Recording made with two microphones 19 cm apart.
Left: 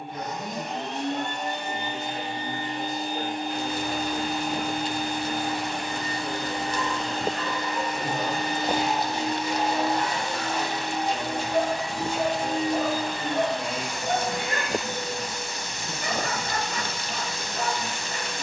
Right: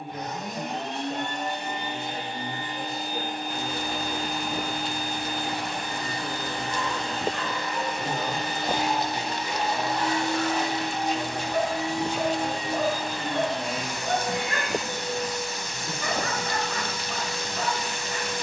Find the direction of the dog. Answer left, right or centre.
left.